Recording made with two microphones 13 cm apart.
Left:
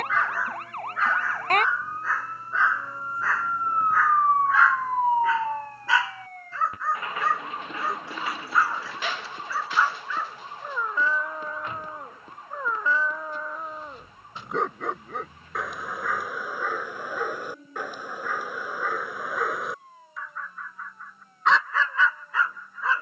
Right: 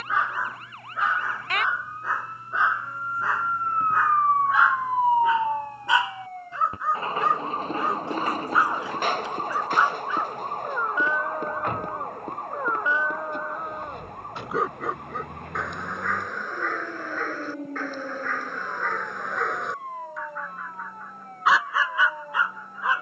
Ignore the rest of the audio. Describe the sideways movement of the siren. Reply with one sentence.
You can hear the siren go from the left side to the right.